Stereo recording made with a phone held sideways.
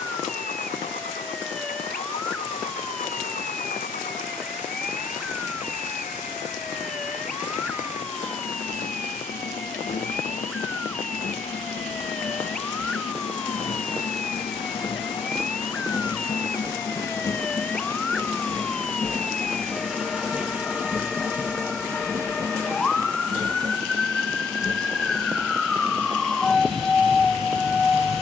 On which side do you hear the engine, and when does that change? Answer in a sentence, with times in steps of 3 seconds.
In this clip you hear the engine on the left from 0 s, in the centre from 18 s and on the right from 21 s.